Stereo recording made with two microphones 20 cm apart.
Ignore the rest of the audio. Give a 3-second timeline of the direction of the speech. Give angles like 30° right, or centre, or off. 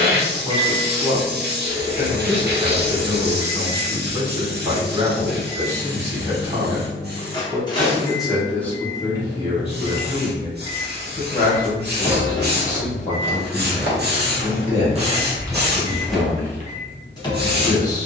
30° right, 30° right, 10° right, 30° left, 40° left, 40° left.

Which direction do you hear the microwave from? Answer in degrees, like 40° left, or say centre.
20° left.